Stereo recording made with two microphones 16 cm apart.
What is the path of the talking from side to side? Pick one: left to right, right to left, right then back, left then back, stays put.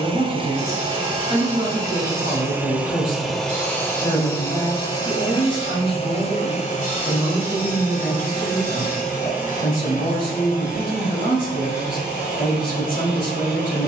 stays put.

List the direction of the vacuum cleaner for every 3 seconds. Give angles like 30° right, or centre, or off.
30° right, 20° left, 50° left, 60° left, 60° left.